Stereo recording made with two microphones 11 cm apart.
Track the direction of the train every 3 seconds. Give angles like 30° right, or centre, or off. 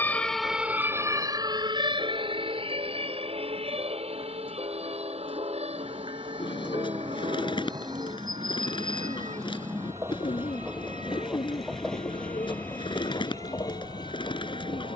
60° right, 50° right, 40° right, 20° right, 30° left.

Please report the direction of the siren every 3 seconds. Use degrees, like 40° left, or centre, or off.
30° right, 70° right, 80° right, 80° right, 80° right.